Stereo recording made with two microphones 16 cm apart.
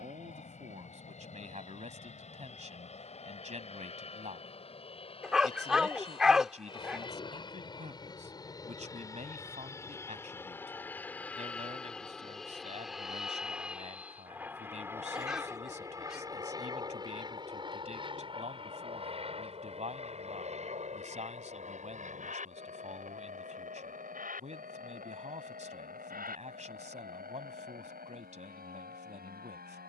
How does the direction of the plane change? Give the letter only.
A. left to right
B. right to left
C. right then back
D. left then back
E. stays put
A.